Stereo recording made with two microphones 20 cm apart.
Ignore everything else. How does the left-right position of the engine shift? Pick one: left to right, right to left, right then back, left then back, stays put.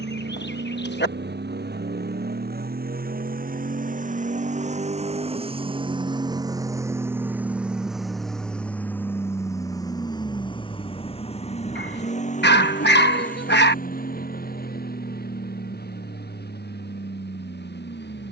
right to left.